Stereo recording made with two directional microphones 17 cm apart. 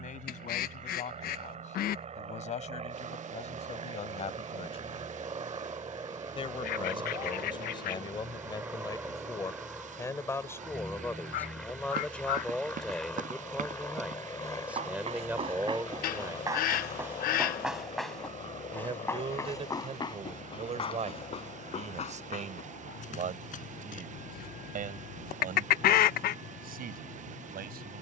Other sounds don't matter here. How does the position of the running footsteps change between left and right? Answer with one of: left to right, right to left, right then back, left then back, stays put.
right to left.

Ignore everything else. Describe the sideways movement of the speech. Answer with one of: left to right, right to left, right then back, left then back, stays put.
left to right.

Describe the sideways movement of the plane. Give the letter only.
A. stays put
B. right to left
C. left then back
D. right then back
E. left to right
B.